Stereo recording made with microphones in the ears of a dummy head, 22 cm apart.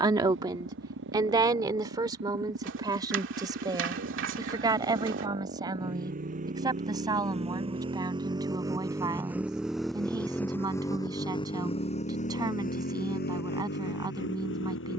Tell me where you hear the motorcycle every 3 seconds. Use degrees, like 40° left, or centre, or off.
50° right, 40° right, 30° right, 10° left, 50° left.